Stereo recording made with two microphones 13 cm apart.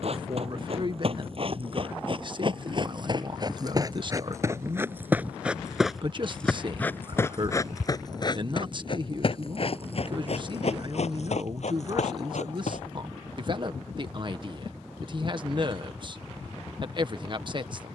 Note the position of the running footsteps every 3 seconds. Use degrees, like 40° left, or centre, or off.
50° right, 20° right, 20° left, 60° left, 70° left, off.